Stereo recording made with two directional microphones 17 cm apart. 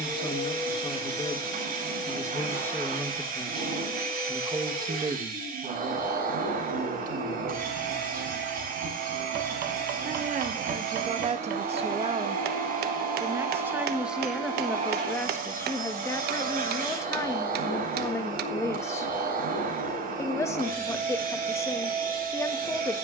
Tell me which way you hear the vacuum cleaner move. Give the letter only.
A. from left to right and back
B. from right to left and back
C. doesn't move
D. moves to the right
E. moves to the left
C.